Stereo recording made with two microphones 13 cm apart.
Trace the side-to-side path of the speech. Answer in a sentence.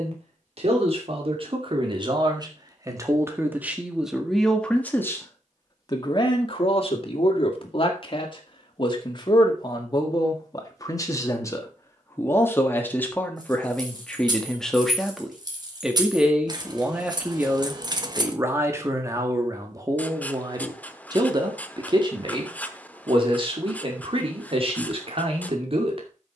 In this clip you hear the speech go left and come back.